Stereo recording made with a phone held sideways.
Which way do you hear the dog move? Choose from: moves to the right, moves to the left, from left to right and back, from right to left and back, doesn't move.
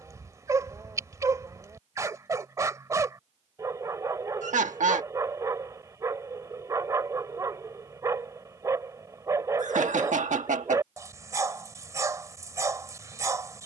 doesn't move.